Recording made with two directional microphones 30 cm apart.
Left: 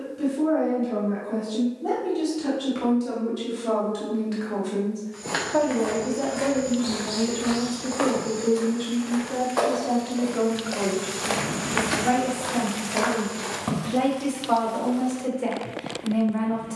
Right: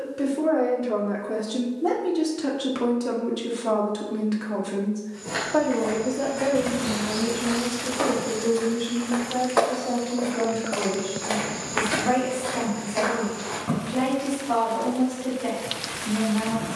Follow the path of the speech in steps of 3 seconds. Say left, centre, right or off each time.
right, right, centre, left, left, left.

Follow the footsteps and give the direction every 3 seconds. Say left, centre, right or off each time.
off, left, left, centre, left, off.